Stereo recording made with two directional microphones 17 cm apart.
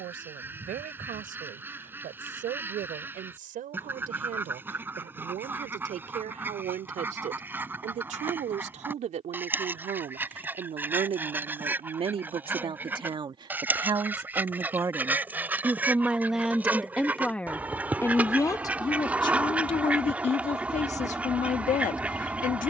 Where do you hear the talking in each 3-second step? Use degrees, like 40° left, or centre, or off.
60° right, 60° right, 50° right, 40° right, 30° right, centre, 30° left, 50° left.